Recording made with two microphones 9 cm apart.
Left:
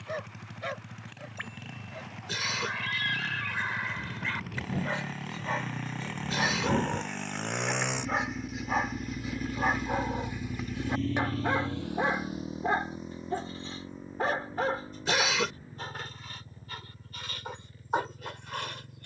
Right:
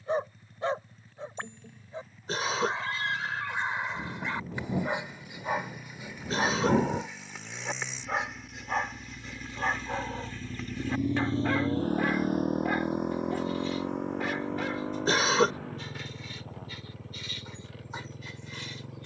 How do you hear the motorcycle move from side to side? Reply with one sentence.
In this clip you hear the motorcycle move from left to right.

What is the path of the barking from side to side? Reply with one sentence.
You can hear the barking go from the right side to the left.